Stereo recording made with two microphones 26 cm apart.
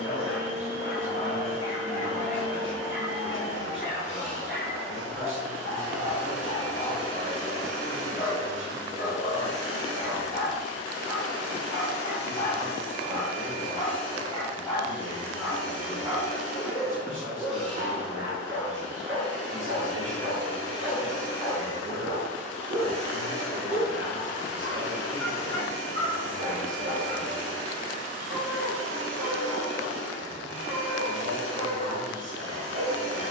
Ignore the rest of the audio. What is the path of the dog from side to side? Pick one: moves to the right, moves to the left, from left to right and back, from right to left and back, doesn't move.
moves to the right.